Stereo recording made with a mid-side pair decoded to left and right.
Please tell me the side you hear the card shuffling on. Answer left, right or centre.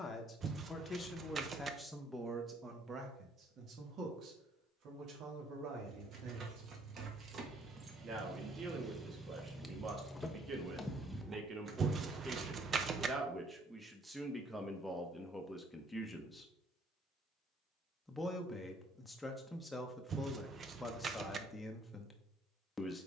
right.